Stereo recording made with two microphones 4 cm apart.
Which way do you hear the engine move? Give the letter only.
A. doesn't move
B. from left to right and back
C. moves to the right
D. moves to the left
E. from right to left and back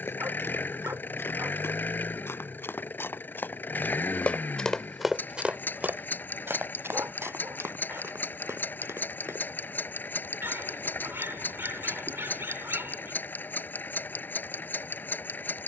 A.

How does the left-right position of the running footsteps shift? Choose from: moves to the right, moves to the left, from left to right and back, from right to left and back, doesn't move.
moves to the right.